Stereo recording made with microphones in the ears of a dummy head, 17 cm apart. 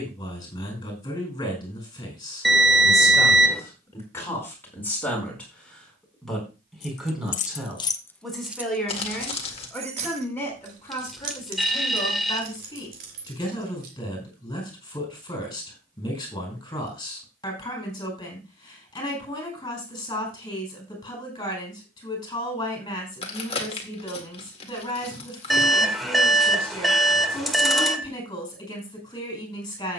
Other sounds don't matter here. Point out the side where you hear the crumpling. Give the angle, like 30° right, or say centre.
30° left.